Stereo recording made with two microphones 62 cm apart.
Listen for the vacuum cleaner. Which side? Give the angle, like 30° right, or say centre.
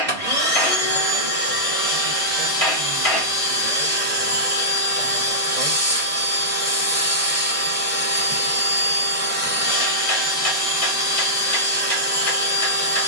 20° right.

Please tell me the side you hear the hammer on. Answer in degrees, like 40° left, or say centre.
60° left.